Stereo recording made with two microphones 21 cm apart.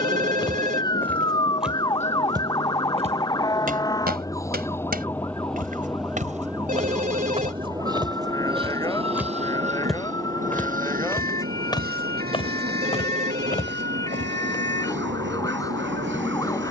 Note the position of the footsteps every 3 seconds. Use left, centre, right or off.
centre, right, right, centre, left, off.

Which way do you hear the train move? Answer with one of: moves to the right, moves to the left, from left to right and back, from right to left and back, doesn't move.
moves to the right.